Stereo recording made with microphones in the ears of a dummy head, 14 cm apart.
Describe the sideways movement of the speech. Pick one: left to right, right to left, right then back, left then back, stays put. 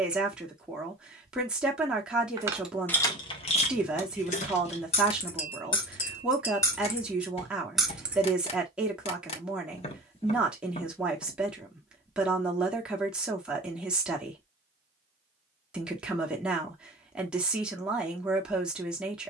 stays put.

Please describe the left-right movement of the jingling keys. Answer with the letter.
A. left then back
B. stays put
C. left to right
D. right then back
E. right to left
A.